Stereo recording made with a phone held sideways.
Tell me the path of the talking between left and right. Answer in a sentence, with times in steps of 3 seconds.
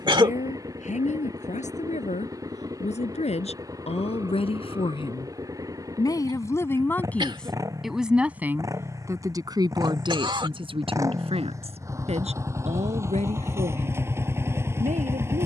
In this clip you hear the talking on the left from 0 s, in the centre from 6 s and on the right from 9 s.